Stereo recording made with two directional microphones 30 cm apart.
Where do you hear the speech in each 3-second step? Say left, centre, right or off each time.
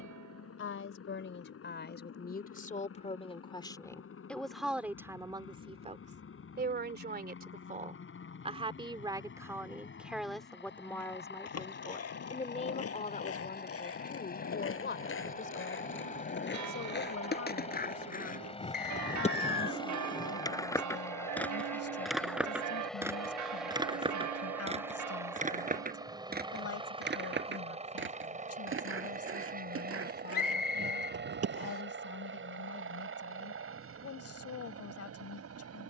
left, centre, right, centre, left, left, left, left, left, left, left, left.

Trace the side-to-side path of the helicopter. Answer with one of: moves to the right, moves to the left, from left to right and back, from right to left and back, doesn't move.
moves to the right.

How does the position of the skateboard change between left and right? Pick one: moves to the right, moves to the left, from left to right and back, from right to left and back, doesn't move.
moves to the right.